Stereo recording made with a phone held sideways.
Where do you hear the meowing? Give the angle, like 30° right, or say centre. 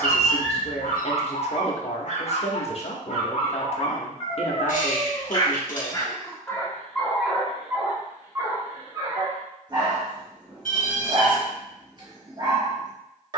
70° left.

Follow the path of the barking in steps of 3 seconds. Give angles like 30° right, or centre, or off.
60° left, 40° left, centre, 30° right, 30° right.